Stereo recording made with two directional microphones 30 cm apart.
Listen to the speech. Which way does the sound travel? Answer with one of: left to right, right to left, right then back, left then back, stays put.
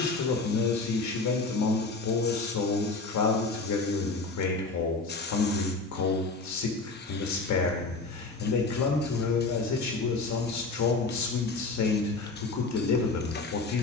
stays put.